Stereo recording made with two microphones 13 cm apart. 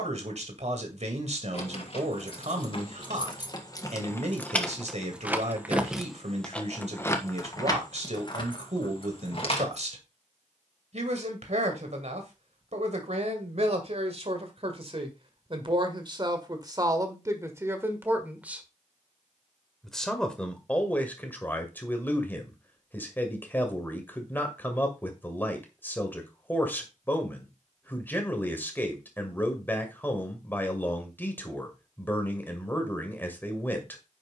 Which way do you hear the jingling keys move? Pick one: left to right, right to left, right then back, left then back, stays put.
right then back.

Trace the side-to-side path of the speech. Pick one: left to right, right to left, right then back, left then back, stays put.
right to left.